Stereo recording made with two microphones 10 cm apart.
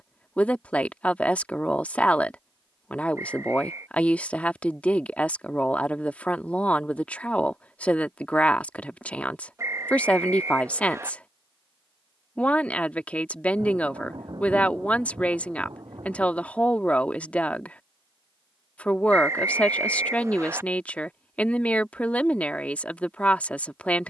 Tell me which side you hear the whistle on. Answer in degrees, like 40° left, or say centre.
30° right.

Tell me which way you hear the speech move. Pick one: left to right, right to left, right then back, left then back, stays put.
stays put.